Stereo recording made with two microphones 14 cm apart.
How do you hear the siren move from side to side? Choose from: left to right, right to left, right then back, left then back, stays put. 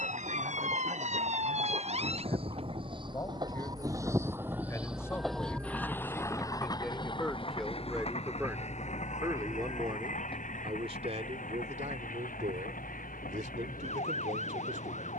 right to left.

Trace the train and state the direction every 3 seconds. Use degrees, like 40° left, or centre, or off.
50° right, 10° right, 40° left, 60° left, 70° left.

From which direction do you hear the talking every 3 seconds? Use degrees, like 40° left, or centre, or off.
30° left, 20° left, centre, 40° right, 70° right.